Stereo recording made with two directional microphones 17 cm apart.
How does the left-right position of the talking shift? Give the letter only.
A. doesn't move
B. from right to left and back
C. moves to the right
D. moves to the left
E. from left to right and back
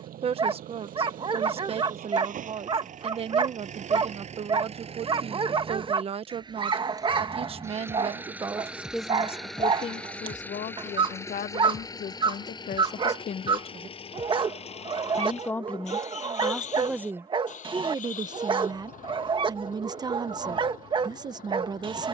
B.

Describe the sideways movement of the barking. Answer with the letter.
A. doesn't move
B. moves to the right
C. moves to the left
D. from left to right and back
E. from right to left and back
A.